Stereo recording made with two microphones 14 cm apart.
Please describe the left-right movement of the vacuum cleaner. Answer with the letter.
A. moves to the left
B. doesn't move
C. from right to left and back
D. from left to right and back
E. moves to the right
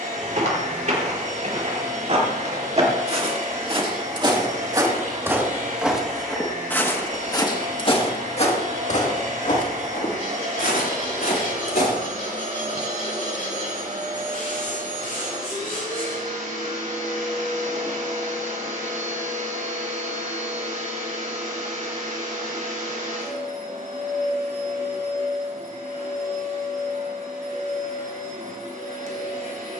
B.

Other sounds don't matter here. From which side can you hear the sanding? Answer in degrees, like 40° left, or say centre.
60° left.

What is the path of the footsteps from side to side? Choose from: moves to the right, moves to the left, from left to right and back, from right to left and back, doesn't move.
moves to the left.